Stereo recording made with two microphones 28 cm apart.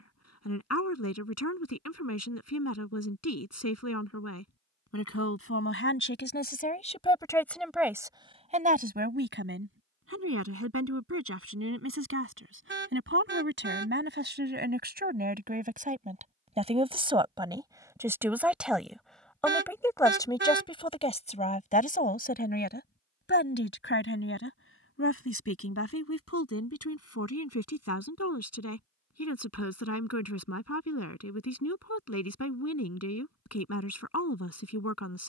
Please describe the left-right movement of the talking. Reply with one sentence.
You can hear the talking move from left to right and back again.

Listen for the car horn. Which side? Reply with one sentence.
In this clip you hear the car horn on the right.